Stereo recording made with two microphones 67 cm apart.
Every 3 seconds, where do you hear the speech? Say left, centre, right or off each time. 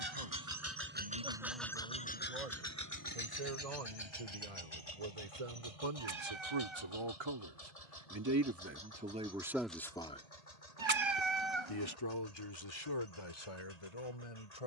right, right, right, centre, left.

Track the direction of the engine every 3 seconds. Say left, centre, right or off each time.
centre, left, left, left, left.